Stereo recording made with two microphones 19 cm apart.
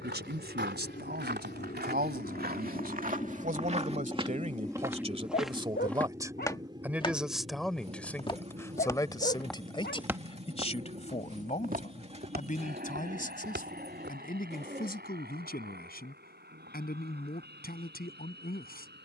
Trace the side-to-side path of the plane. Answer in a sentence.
You can hear the plane move from left to right.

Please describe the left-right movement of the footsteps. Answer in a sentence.
In this clip you hear the footsteps go left and come back.